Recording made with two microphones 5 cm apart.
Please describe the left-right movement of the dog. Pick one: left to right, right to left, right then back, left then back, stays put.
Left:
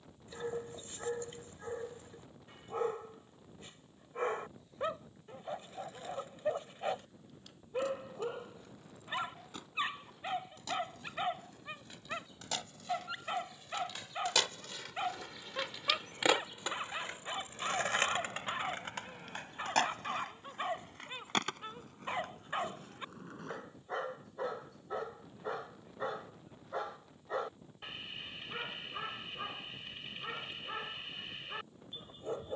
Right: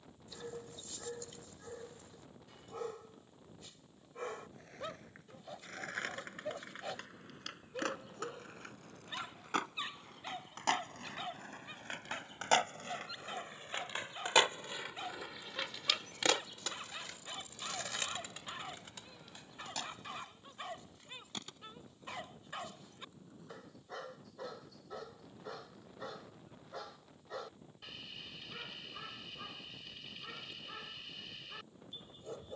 stays put.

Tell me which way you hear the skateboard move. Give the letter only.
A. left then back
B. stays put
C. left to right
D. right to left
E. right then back
D.